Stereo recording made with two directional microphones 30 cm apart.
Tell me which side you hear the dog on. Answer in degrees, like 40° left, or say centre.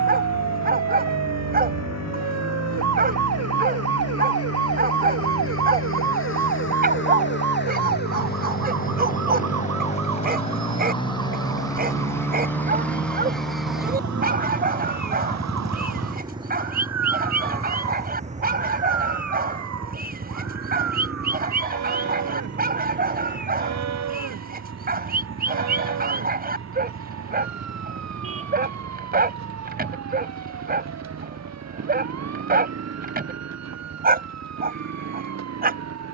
30° right.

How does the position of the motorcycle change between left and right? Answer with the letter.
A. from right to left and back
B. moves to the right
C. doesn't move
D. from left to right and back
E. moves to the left
B.